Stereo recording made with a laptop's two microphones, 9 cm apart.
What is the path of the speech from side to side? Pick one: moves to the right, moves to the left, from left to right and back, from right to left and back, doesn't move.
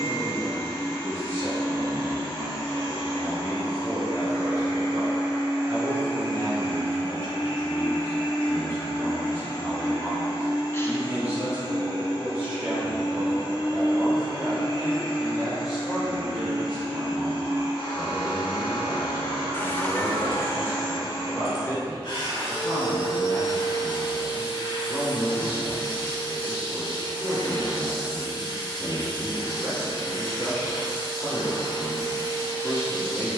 moves to the left.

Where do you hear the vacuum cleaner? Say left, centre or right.
left.